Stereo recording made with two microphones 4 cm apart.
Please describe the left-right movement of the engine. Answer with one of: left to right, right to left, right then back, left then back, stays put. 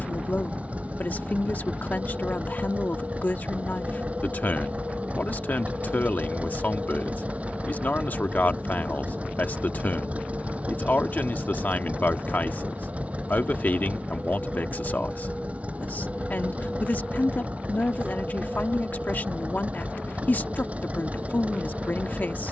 stays put.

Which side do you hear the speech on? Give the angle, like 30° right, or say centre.
50° left.